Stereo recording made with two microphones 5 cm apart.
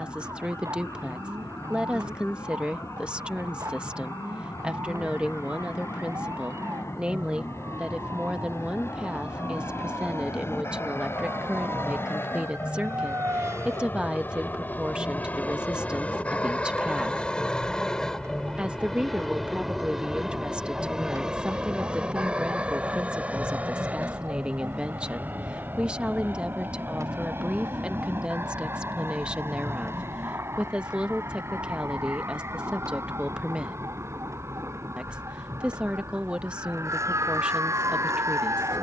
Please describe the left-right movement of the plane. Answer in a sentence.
You can hear the plane move to the right.